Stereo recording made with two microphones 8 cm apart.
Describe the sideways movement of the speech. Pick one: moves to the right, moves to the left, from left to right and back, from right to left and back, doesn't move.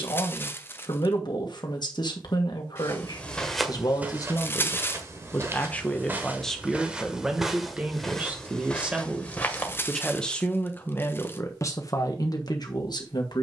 from left to right and back.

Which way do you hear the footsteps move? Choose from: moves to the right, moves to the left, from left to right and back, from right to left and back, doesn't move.
from left to right and back.